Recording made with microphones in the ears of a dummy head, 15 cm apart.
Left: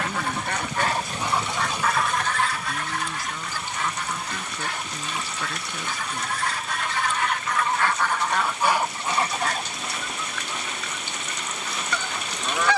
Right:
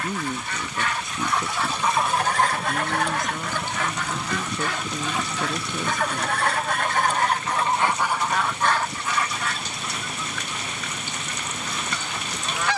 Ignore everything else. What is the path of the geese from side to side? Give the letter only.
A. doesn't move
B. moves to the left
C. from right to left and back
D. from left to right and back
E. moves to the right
D.